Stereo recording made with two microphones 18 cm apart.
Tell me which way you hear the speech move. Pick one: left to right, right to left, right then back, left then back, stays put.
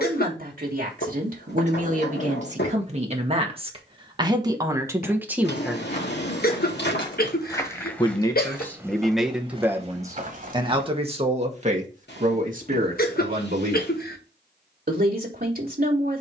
left then back.